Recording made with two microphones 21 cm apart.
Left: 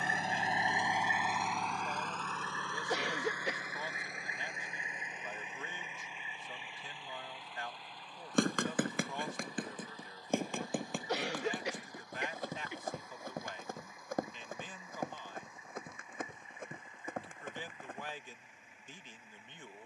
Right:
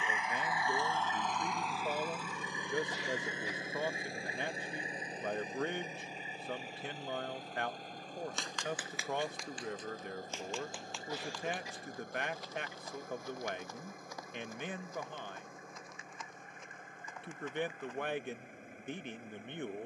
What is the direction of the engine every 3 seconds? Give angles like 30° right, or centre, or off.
centre, 30° right, 40° right, 50° right, 50° right, 50° right, 50° right.